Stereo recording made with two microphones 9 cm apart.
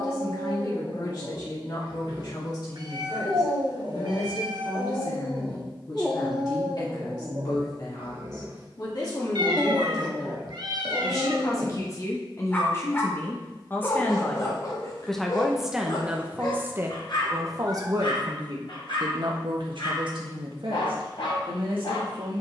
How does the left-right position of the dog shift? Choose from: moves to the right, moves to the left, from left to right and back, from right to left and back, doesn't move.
from left to right and back.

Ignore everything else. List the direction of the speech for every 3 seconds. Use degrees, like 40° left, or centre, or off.
60° left, 60° left, 50° left, 50° left, 30° left, 20° right, 70° right, 80° right.